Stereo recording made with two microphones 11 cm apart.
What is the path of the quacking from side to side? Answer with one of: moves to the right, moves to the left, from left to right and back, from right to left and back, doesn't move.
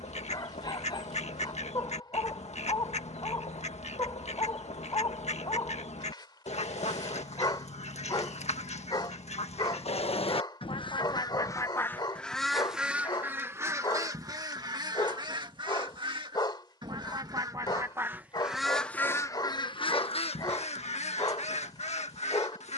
from left to right and back.